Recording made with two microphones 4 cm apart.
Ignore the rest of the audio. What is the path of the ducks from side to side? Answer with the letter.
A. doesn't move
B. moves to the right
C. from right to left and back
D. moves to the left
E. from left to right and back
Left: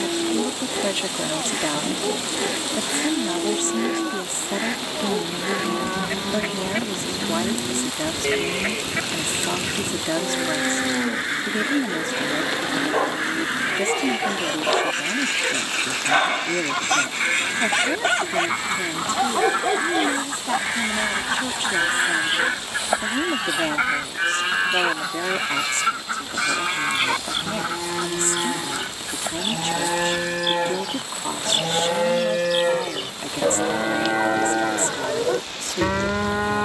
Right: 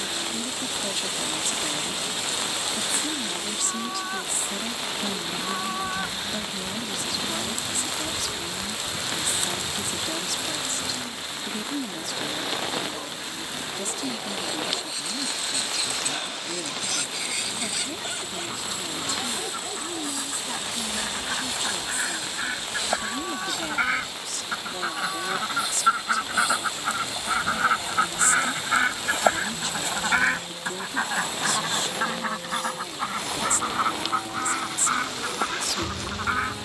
B.